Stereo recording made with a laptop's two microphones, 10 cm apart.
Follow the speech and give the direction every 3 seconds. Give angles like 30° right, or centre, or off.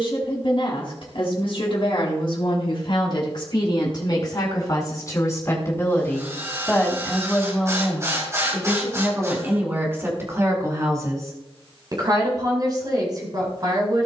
60° left, 40° left, centre, 30° right, 40° right.